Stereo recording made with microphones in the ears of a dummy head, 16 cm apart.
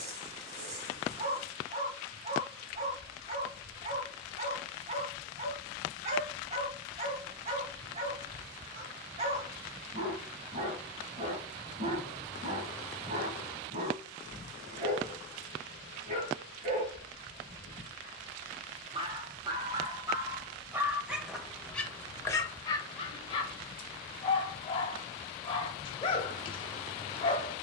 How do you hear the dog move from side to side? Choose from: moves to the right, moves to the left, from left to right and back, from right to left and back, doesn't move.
moves to the left.